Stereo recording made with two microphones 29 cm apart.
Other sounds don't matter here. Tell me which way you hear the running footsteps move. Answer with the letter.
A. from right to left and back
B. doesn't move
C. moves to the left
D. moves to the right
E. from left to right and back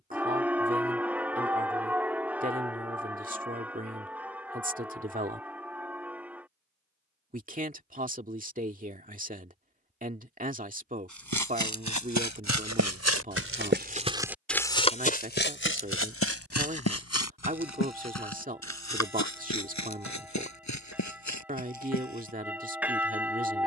C.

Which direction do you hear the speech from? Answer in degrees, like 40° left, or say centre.
30° right.